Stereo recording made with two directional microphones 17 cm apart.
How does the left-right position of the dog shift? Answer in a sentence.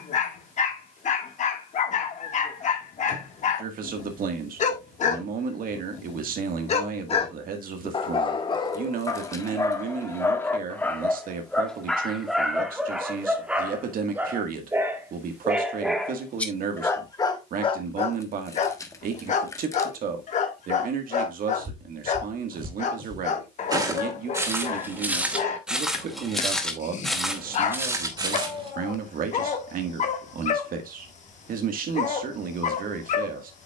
In this clip you hear the dog go right and come back.